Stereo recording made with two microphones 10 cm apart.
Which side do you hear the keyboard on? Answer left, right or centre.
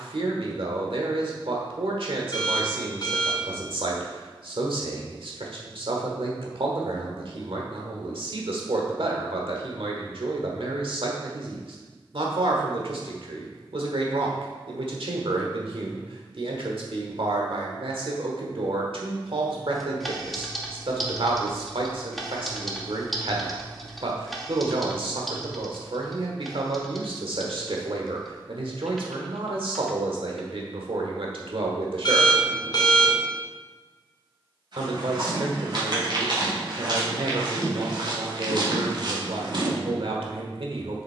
centre.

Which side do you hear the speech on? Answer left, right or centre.
right.